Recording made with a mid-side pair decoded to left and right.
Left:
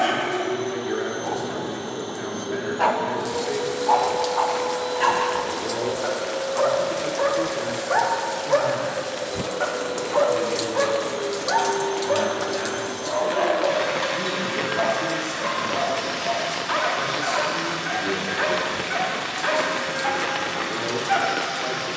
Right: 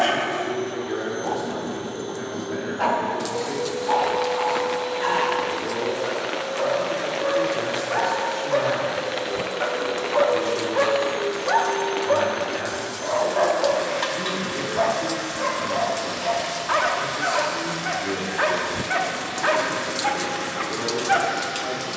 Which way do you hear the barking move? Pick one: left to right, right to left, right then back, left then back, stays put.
left then back.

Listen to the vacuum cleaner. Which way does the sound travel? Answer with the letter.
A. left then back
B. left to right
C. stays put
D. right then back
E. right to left
D.